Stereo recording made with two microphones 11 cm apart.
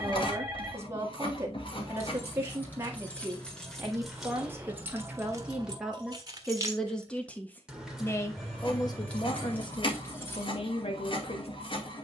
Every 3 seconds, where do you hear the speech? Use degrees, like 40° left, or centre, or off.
30° right, 20° right, 10° left, 50° left.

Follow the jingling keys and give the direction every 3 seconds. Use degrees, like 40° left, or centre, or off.
20° left, 10° right, 10° right, 20° left.